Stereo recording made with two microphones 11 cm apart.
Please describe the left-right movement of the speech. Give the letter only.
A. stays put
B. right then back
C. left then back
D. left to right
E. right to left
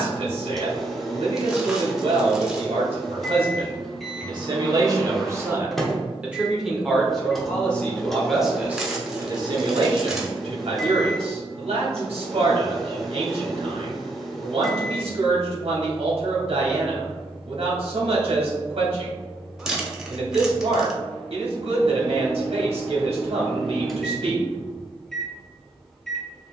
C.